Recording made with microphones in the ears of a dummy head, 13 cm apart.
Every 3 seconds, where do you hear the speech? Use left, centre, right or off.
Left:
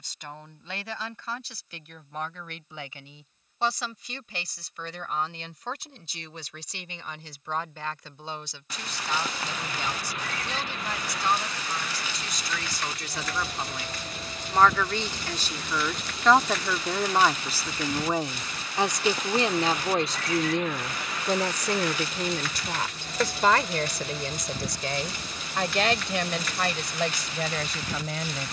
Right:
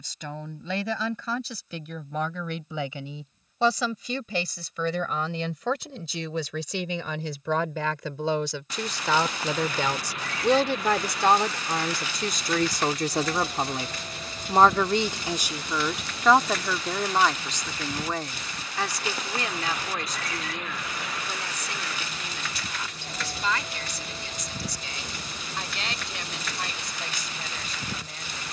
right, right, right, right, right, centre, left, left, left, left.